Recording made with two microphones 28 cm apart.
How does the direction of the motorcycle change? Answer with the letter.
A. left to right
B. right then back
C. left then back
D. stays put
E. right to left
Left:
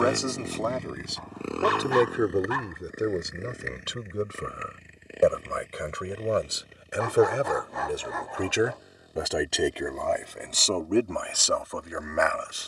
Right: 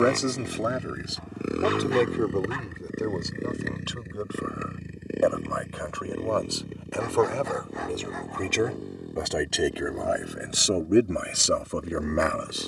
A.